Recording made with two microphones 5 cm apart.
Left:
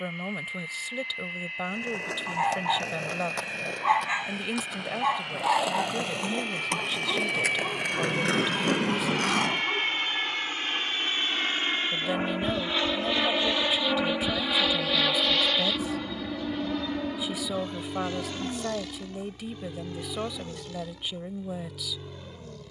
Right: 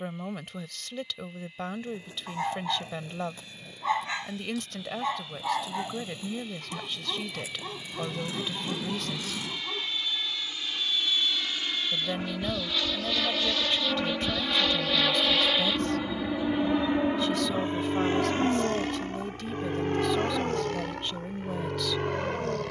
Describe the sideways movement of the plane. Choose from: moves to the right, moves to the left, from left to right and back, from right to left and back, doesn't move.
moves to the right.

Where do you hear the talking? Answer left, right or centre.
centre.